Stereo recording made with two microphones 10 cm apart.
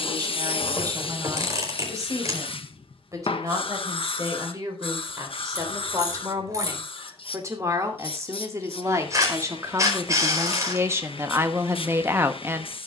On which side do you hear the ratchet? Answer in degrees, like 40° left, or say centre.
30° right.